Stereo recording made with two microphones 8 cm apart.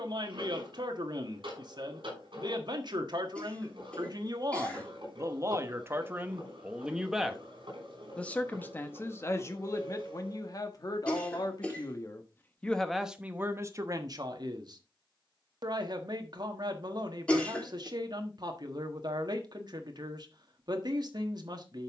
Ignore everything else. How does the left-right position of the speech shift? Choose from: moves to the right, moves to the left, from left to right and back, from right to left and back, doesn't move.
from right to left and back.